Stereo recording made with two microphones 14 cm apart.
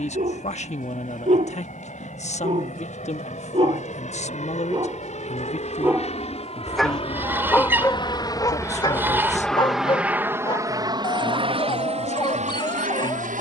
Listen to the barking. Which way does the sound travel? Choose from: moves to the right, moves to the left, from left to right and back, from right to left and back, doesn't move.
moves to the left.